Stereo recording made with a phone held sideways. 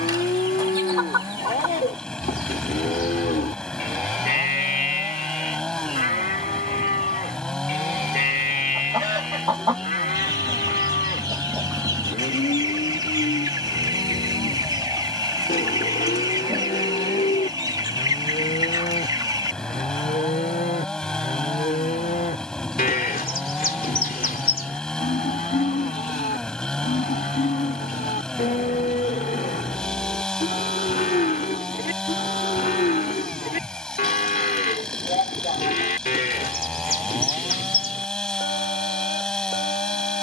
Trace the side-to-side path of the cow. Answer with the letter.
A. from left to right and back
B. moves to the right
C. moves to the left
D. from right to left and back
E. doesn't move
E.